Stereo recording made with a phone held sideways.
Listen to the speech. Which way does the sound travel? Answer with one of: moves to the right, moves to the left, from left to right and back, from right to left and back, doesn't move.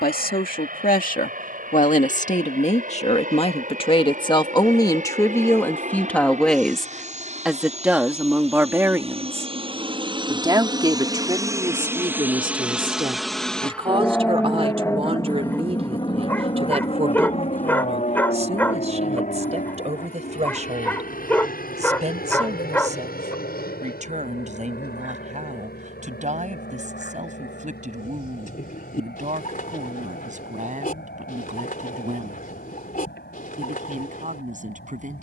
moves to the right.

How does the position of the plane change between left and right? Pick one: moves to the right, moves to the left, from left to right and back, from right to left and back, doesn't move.
moves to the left.